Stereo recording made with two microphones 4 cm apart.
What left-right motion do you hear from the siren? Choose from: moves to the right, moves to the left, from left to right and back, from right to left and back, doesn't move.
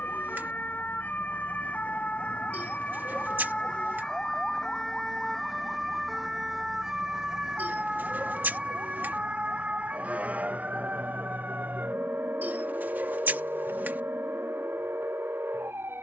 moves to the right.